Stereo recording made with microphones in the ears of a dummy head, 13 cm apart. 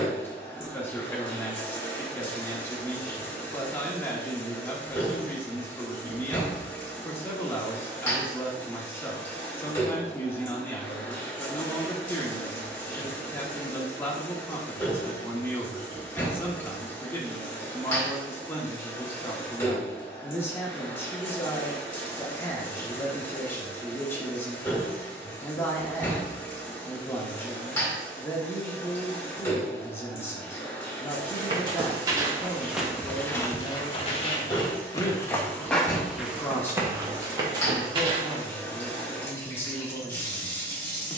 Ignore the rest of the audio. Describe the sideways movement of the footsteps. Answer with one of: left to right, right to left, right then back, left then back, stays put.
left then back.